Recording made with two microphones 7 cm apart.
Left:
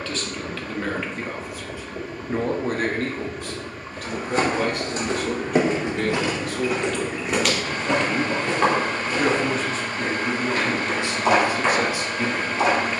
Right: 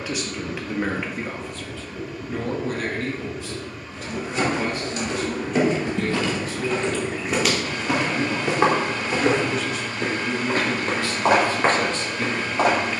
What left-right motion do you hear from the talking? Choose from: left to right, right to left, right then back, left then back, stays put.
left then back.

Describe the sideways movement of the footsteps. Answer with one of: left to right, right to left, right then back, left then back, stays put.
left to right.